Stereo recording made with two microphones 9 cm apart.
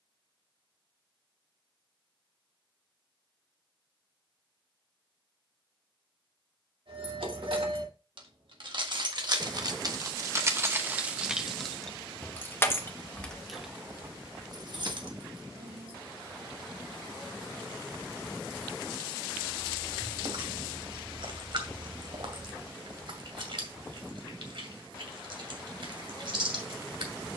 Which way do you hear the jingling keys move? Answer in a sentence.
In this clip you hear the jingling keys go left and come back.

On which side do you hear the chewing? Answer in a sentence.
You can hear the chewing on the right.